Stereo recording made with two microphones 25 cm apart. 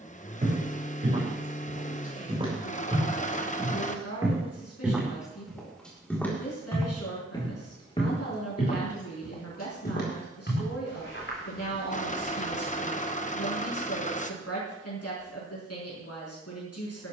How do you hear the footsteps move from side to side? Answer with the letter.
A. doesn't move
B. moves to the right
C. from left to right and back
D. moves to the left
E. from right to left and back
D.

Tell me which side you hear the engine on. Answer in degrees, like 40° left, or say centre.
30° left.